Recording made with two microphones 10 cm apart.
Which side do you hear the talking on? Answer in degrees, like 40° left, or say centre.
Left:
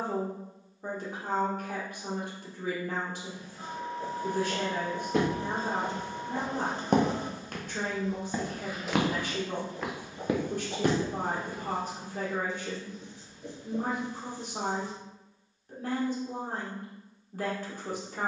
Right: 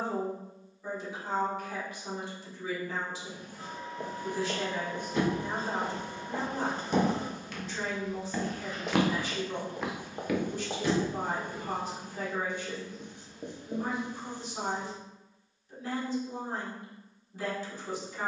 50° left.